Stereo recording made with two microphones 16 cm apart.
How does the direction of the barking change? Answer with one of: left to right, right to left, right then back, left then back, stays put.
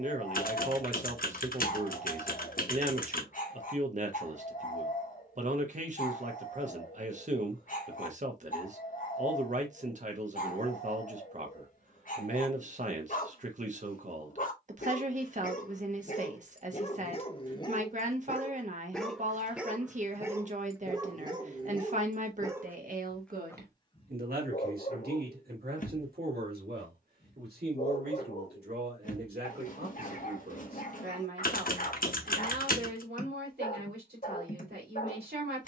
right then back.